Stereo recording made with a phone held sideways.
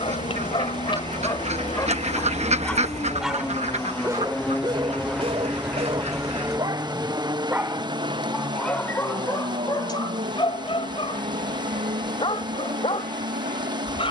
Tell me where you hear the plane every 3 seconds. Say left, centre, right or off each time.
left, centre, right, right, right.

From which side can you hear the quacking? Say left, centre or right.
right.